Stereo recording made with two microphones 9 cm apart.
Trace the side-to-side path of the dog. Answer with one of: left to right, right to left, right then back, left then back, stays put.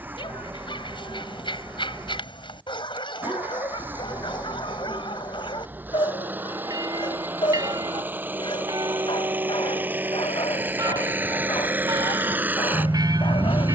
stays put.